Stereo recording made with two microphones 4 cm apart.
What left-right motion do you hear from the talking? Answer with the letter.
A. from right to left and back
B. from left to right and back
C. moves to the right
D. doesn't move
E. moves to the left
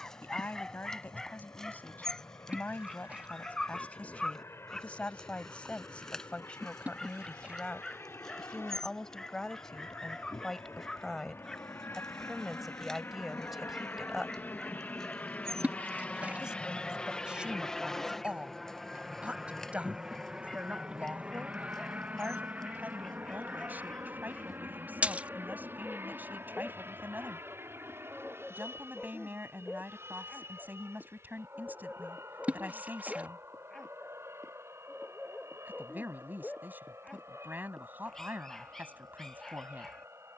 C.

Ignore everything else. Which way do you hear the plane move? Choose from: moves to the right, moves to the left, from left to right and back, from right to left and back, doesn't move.
moves to the right.